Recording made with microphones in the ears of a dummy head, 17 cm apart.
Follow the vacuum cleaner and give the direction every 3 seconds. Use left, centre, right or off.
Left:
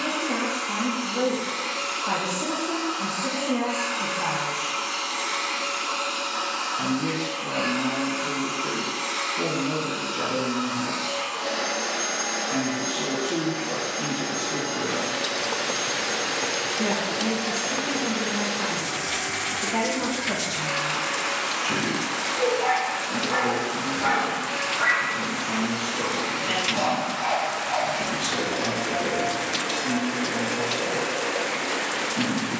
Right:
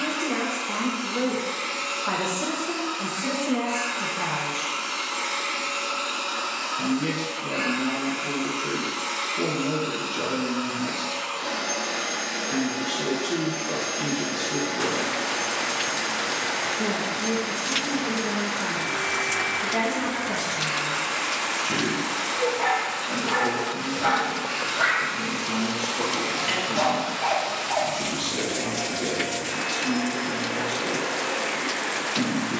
left, left, left, left, centre, right, right, right, right, right, right.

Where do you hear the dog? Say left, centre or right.
right.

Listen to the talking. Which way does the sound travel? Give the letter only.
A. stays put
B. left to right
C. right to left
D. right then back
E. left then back
E.